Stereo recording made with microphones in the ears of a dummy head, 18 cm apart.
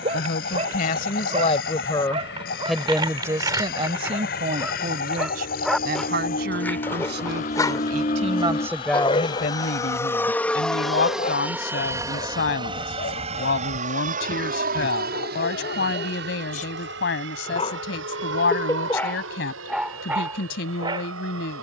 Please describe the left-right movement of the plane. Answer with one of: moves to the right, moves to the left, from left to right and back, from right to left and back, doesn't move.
moves to the right.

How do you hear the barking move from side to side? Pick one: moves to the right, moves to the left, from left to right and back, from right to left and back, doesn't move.
from right to left and back.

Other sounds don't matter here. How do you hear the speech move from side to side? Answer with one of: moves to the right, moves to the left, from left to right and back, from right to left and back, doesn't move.
from left to right and back.